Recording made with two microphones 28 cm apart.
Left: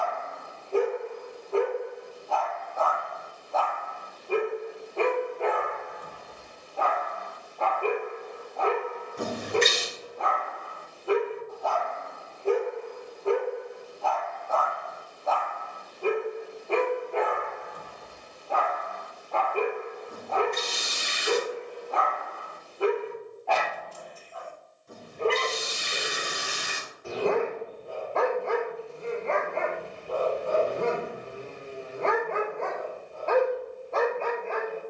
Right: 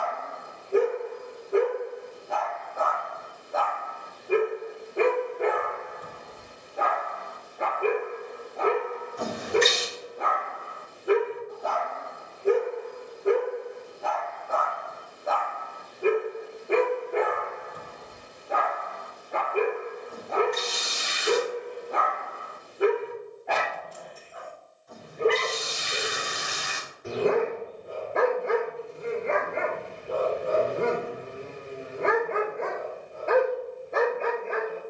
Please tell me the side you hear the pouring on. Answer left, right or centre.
left.